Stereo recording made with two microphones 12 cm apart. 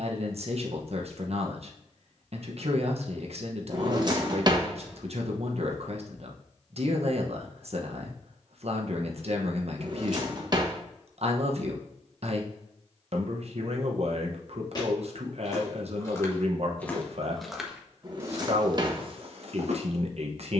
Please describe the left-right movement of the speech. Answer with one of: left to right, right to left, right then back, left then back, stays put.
stays put.